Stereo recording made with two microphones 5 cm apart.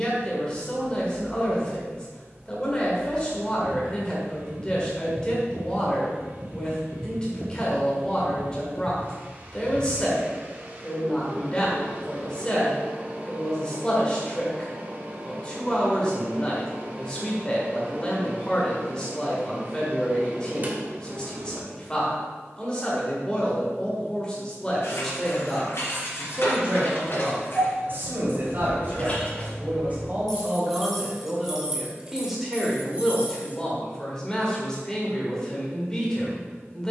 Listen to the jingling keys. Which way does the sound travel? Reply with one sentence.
In this clip you hear the jingling keys move to the right.